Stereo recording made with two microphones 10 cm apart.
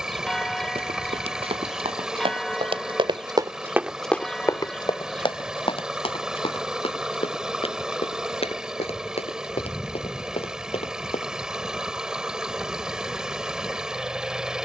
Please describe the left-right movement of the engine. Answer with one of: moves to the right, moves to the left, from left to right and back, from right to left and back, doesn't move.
doesn't move.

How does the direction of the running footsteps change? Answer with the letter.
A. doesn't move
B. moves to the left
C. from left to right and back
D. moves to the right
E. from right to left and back
B.